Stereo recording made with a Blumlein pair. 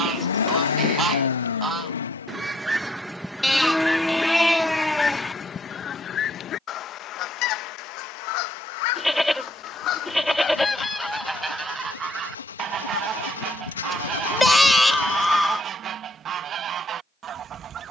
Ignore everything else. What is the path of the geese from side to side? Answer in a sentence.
You can hear the geese move from right to left and back again.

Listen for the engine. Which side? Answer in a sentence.
You can hear the engine on the left.